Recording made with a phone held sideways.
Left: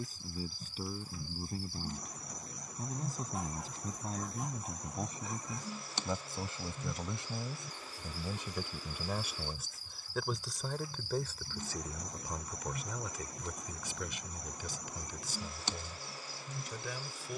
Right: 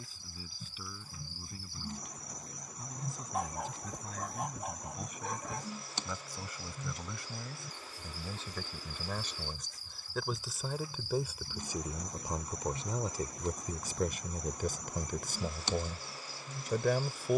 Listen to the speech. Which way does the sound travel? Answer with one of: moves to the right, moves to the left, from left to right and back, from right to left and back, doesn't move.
moves to the right.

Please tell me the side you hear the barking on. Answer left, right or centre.
right.